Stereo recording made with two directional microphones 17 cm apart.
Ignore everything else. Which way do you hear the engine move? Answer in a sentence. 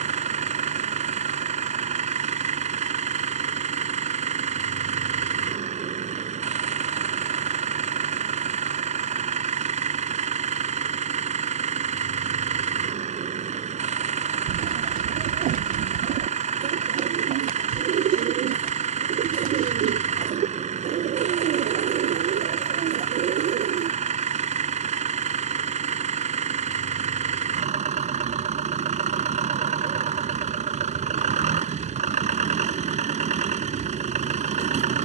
You can hear the engine stay put.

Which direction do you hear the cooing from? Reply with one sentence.
You can hear the cooing on the right.